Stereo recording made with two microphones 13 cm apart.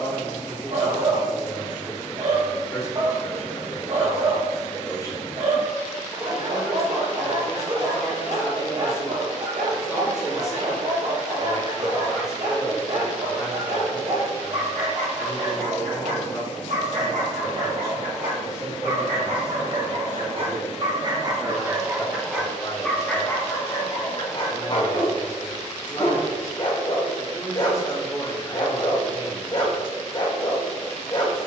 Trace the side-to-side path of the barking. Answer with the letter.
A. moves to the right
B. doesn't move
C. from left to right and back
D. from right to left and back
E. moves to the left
E.